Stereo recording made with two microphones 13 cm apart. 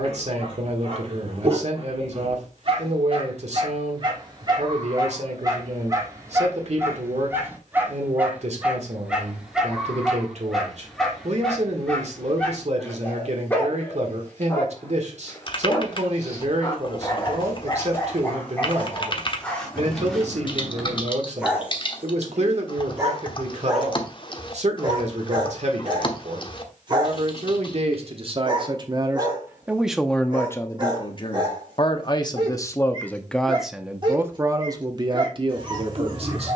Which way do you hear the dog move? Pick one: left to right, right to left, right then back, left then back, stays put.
left then back.